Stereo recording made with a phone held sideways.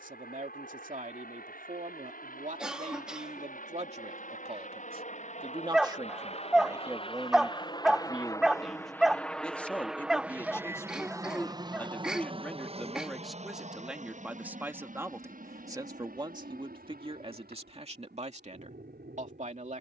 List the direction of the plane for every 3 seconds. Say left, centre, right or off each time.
left, left, left, centre, right, right, right.